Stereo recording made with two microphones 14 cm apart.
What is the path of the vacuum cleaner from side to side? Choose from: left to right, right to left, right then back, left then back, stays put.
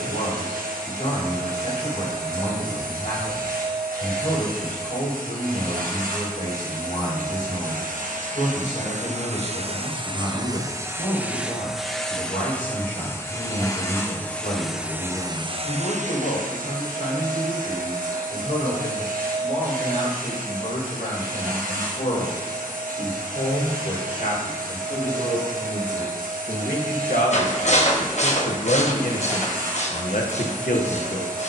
left then back.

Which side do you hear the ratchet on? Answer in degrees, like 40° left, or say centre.
50° left.